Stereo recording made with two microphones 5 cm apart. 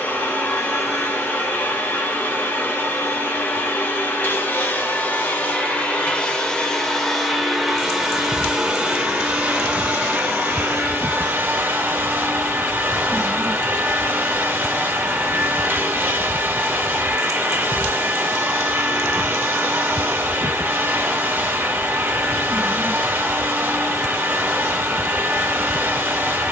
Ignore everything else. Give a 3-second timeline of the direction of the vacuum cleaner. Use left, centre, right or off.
left, left, centre, right, right, right, right, right, right.